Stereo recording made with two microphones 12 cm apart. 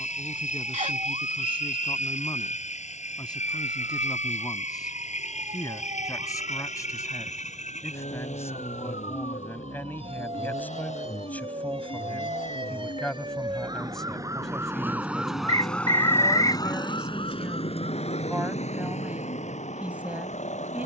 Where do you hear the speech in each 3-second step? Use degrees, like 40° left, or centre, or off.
40° left, 30° left, 30° left, 20° left, 10° left, centre, 10° right.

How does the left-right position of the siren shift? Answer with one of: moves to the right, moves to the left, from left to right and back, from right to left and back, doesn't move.
moves to the left.